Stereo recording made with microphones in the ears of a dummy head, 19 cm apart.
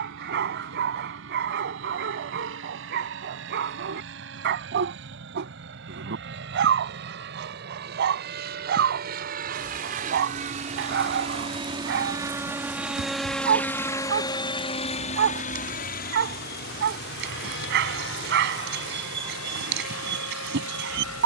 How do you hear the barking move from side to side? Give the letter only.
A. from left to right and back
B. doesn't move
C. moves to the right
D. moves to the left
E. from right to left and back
B.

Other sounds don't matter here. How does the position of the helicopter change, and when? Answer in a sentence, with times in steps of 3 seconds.
In this clip you hear the helicopter on the right from 0 s, in the centre from 12 s and on the left from 15 s.